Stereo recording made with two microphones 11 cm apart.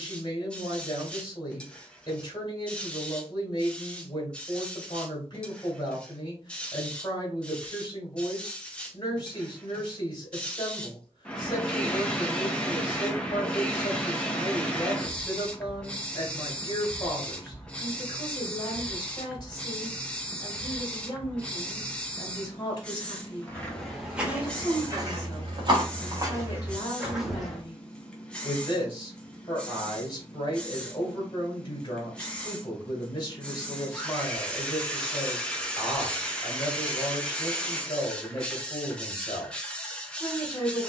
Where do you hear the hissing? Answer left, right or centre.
centre.